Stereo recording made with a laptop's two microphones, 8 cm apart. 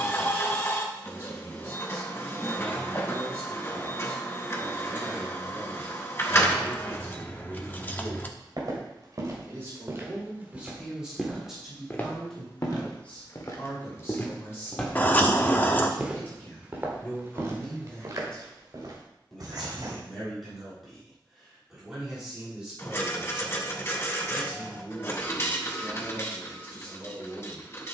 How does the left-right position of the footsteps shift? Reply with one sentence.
You can hear the footsteps go left and come back.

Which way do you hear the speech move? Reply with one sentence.
You can hear the speech go left and come back.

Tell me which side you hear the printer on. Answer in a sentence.
In this clip you hear the printer on the left.